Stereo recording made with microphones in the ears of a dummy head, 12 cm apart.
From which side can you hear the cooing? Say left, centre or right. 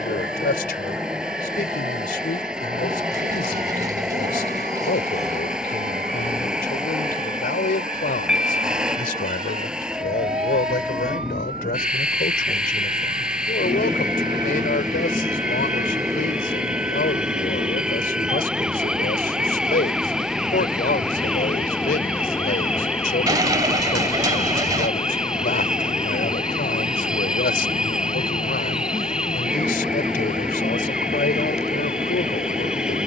right.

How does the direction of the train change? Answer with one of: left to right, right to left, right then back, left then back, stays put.
stays put.